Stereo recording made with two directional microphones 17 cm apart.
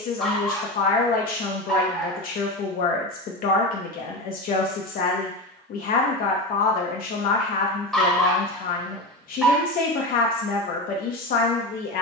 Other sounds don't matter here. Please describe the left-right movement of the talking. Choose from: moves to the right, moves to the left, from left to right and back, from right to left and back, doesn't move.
doesn't move.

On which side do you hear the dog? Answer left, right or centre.
centre.